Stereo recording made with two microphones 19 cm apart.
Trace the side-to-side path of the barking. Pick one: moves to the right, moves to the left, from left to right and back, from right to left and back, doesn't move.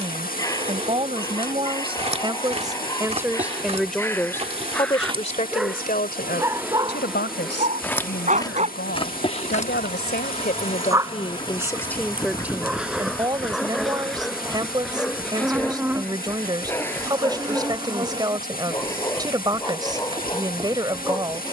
from left to right and back.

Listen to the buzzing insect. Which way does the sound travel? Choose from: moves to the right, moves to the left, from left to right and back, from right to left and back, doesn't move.
from right to left and back.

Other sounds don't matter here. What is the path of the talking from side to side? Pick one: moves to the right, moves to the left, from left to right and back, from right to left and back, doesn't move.
from right to left and back.